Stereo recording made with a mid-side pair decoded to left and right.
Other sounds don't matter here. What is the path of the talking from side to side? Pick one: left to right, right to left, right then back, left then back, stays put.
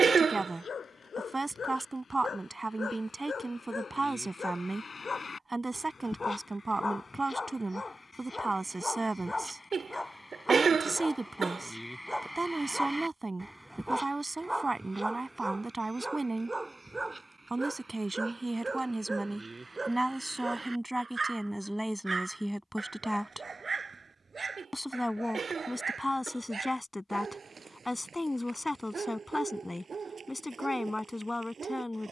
right to left.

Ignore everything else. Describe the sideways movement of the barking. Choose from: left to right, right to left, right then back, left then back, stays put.
left to right.